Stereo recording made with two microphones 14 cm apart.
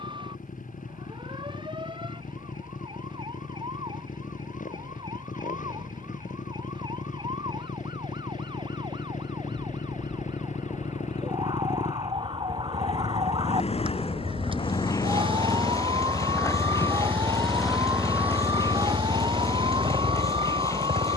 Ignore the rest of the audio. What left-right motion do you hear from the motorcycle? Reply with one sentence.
In this clip you hear the motorcycle move from left to right.